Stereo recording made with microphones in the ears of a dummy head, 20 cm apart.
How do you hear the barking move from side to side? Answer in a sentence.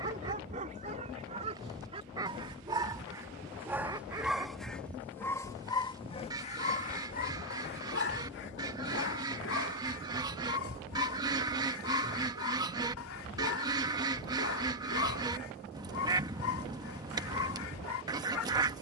In this clip you hear the barking go from the right side to the left.